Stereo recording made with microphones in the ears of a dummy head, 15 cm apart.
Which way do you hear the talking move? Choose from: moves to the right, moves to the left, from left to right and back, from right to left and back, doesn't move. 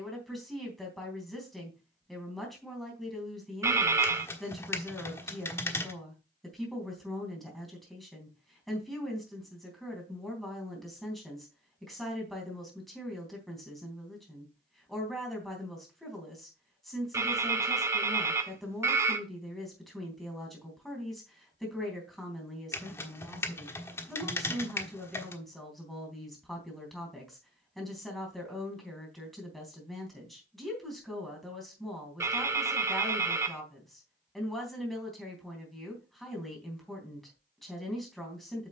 doesn't move.